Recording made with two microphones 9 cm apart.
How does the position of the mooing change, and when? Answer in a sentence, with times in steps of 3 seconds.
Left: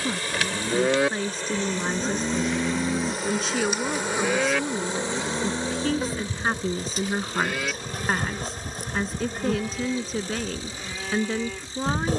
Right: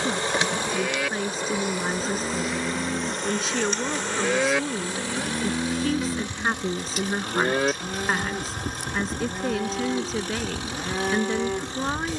You can hear the mooing on the left from 0 s, in the centre from 3 s and on the right from 6 s.